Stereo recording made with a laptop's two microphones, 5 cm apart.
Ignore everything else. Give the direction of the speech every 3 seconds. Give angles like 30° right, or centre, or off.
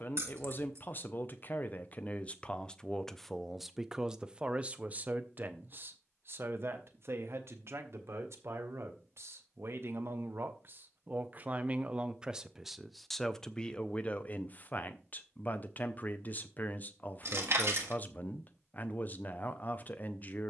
30° left, 20° right, 60° right, 40° right, 10° left, 40° left, 40° left.